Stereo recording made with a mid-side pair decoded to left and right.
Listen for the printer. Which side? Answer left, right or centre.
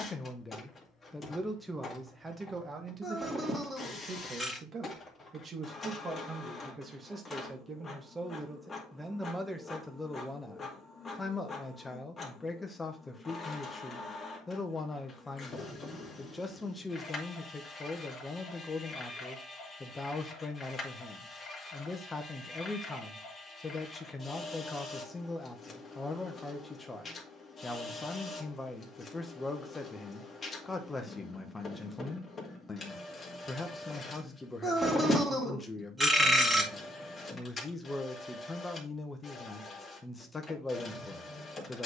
left.